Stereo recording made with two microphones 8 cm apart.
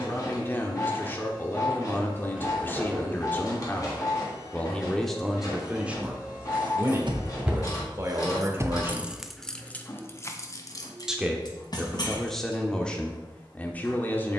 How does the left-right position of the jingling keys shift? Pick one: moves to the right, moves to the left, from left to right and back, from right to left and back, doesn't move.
moves to the left.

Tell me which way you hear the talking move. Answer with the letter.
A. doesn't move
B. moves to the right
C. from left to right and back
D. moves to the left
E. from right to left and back
C.